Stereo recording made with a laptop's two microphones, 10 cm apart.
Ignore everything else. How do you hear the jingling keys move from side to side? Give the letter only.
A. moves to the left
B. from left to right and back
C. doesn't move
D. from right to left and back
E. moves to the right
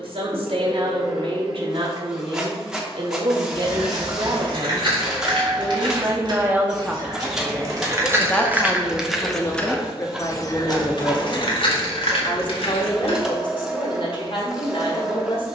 A.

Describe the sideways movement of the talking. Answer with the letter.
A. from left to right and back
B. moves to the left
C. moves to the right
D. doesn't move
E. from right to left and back
B.